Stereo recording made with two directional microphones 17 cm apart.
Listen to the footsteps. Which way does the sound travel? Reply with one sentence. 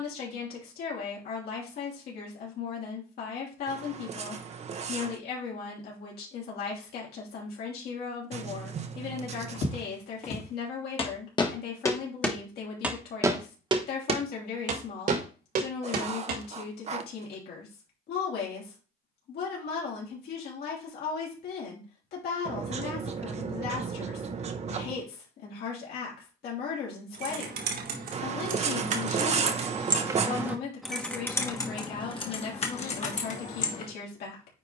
In this clip you hear the footsteps move from left to right.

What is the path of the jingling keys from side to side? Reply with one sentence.
In this clip you hear the jingling keys move from right to left.